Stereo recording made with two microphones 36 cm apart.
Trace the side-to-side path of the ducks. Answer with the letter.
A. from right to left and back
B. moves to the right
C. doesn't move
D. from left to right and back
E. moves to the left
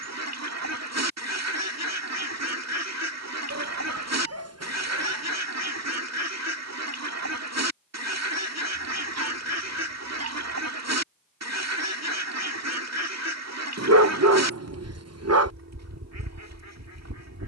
C.